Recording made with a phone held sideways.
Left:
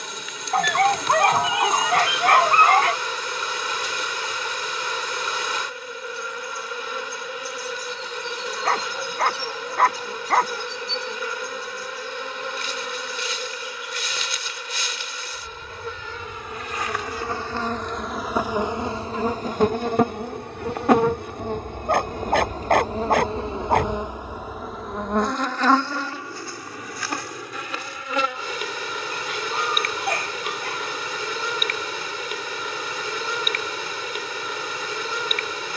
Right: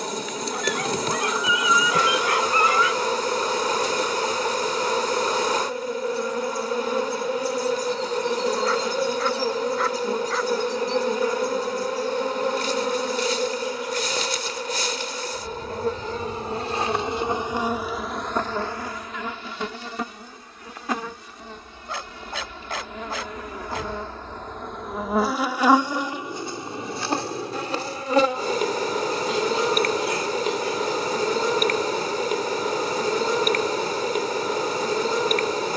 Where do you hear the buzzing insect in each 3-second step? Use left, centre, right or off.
right, right, right, right, right, right, left, left, centre, right, right, right.